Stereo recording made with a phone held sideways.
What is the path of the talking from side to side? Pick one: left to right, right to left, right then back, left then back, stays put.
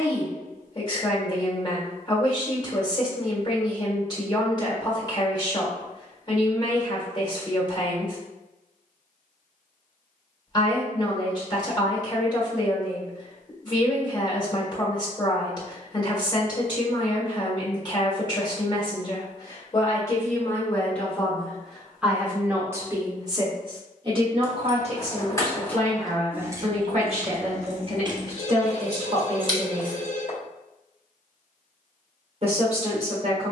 left to right.